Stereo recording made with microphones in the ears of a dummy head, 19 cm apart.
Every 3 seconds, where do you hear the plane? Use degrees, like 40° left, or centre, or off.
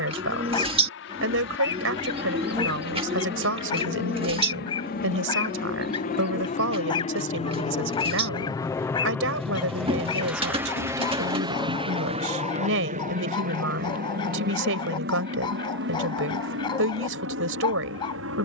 60° left, 50° left, 30° left, 10° right, 40° right, 60° right.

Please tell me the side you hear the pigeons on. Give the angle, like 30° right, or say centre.
30° right.